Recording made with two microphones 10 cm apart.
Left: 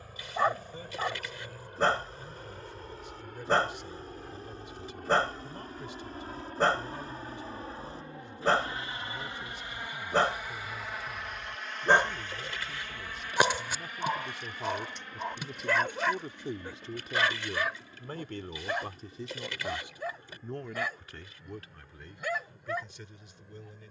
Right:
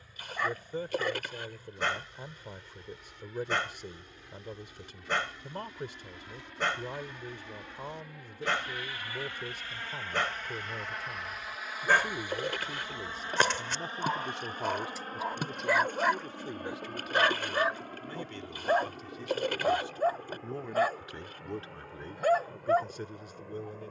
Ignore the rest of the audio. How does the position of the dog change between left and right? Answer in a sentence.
In this clip you hear the dog travel towards the right.